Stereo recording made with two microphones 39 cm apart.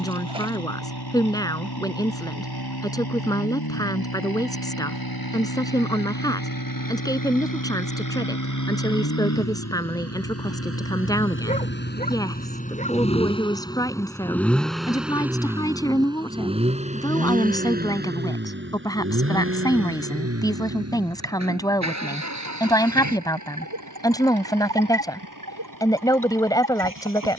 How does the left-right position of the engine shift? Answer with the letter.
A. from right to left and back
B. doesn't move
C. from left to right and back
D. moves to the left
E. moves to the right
E.